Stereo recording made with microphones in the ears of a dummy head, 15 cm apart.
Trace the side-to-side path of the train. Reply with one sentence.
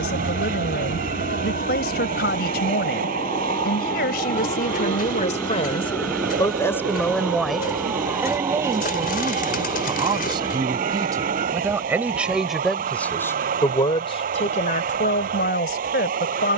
In this clip you hear the train stay put.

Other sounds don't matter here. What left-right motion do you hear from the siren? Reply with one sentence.
You can hear the siren move from left to right.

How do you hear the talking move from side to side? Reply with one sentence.
You can hear the talking move from left to right and back again.